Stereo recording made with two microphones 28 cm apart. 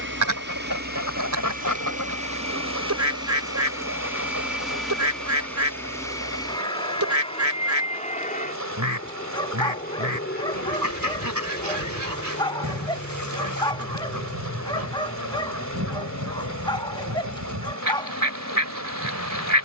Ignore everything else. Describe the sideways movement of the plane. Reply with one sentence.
You can hear the plane go from the right side to the left.